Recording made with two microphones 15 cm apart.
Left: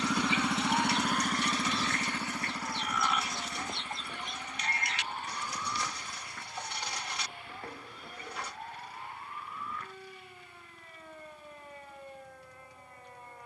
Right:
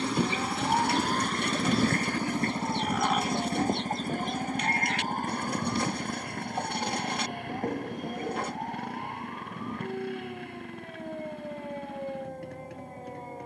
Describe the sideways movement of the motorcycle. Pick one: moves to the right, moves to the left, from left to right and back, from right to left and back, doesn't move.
moves to the right.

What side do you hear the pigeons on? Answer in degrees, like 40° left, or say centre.
50° right.